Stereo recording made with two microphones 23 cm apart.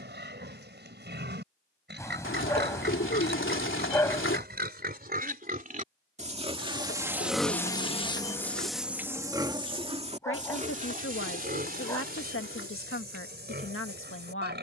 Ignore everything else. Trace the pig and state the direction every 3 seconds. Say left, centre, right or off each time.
right, right, centre, right, right.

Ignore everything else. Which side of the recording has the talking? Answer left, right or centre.
left.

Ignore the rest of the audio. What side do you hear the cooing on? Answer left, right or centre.
left.